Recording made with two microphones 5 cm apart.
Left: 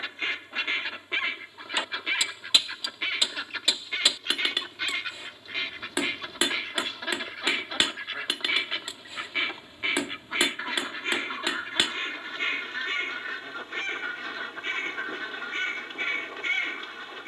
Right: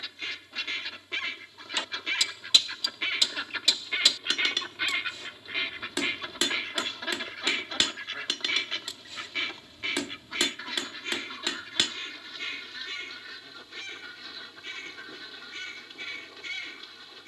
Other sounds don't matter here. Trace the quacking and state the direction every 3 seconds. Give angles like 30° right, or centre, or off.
20° left, centre, 10° left, 30° left, 40° left, 40° left.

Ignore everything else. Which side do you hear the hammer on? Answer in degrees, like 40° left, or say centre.
20° left.